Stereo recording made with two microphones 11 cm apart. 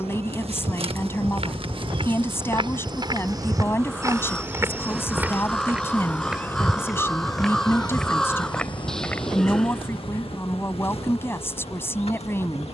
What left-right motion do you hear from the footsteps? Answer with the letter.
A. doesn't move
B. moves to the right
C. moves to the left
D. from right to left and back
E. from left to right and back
C.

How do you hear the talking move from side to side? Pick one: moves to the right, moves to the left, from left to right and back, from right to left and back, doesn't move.
doesn't move.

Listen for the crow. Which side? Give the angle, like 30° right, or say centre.
centre.